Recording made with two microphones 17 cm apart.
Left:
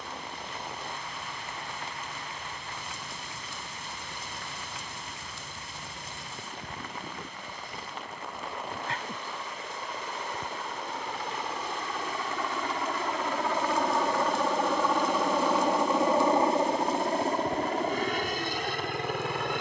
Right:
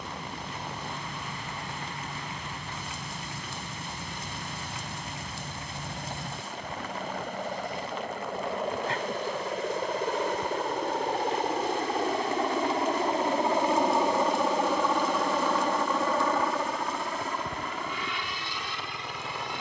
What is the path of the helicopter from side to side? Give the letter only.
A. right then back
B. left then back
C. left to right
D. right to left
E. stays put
D.